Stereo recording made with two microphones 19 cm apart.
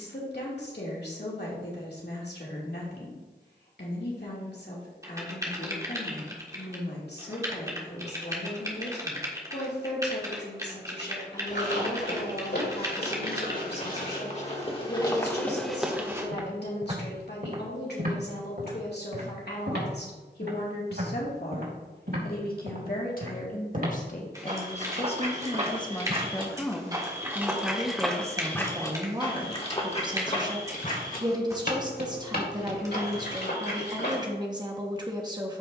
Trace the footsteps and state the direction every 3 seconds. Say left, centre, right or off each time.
off, off, off, left, left, centre, right, right, right, centre, left, left.